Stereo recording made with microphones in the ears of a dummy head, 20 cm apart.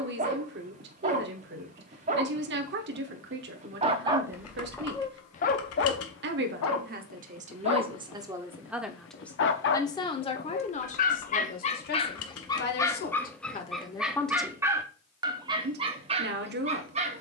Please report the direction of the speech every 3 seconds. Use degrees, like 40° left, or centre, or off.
50° right, 50° right, 30° right, 30° left, 30° left, 40° right.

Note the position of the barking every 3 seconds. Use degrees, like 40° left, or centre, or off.
30° right, centre, 60° left, 40° left, 10° left, 20° right.